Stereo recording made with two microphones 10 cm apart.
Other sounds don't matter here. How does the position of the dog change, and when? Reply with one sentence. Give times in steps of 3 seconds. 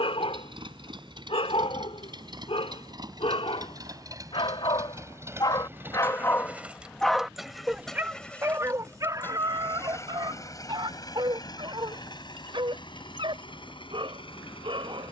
In this clip you hear the dog on the left from 0 s, in the centre from 6 s and on the right from 9 s.